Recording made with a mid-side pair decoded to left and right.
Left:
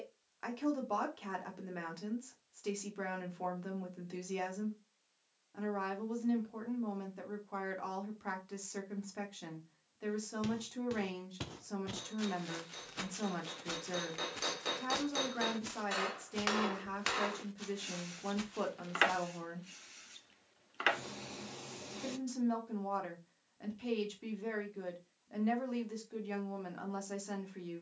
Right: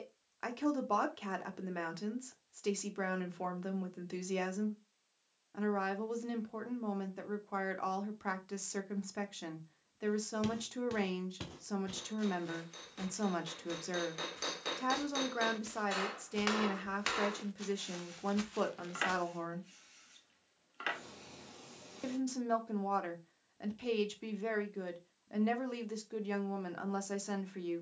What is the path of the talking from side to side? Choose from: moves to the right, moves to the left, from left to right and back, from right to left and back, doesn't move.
doesn't move.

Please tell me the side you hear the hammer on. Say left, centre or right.
centre.